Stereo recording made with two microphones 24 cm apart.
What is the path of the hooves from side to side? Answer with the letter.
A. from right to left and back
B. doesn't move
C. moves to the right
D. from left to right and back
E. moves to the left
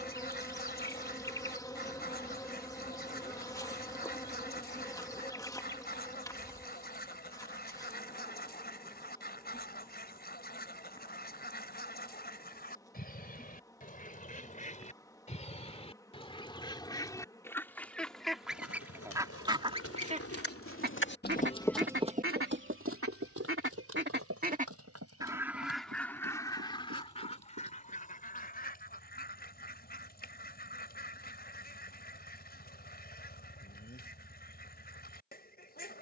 C.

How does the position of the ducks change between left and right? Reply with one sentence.
In this clip you hear the ducks go right and come back.